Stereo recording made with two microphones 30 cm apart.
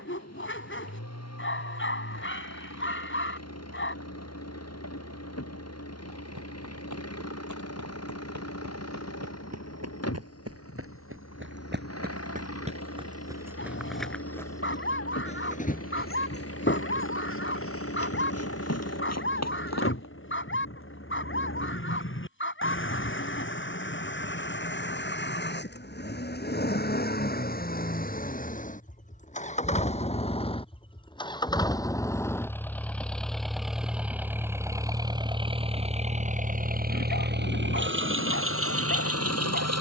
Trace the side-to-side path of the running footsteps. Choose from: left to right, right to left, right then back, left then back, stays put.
right to left.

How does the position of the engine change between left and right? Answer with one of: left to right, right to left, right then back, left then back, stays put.
left to right.